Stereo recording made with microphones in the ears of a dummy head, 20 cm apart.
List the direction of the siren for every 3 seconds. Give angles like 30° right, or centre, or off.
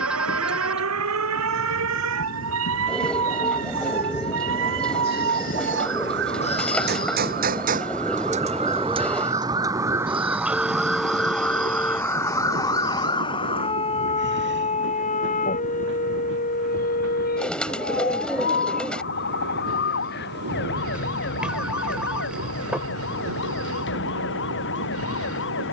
80° right, 60° right, 40° right, 10° right, 20° left, 40° left, 50° left, 50° left, 60° left.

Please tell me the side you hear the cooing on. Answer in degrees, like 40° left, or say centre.
10° left.